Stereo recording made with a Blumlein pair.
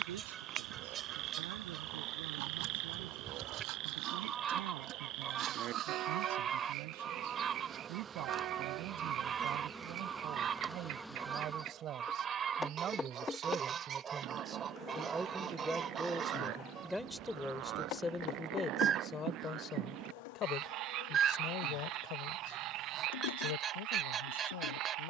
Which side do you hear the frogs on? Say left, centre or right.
right.